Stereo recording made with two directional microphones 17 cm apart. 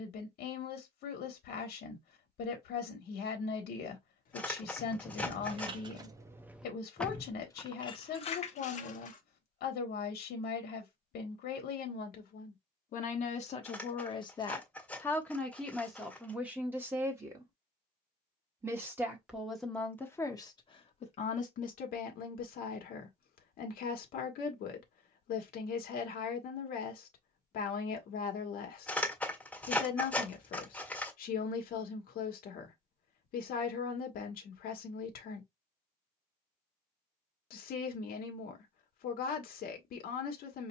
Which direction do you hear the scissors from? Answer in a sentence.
In this clip you hear the scissors in the centre.